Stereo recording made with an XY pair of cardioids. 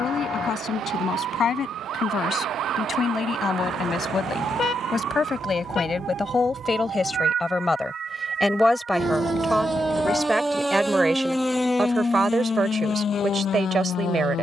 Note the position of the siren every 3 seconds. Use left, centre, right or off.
right, right, right, centre, left.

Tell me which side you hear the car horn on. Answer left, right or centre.
left.